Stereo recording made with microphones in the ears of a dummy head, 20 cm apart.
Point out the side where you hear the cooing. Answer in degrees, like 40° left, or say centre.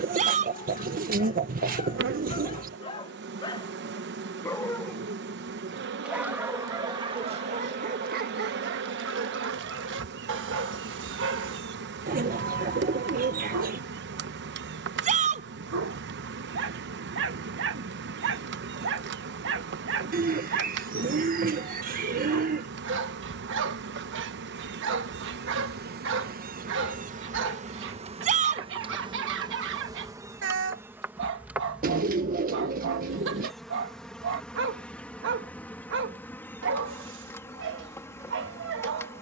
40° right.